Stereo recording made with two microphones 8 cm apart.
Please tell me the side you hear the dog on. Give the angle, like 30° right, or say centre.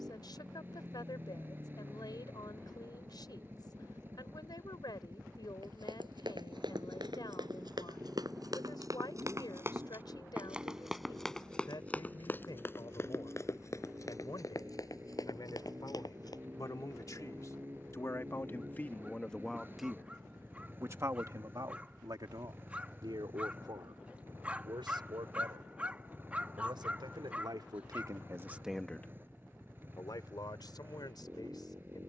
20° right.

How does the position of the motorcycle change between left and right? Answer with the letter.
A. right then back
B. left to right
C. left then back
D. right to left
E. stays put
E.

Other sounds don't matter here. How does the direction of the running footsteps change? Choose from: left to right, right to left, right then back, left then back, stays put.
right to left.